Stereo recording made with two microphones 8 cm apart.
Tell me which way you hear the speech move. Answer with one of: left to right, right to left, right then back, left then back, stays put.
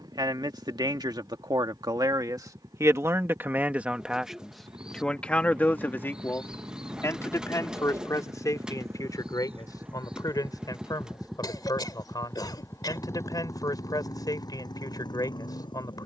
right to left.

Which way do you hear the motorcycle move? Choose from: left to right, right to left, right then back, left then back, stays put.
right to left.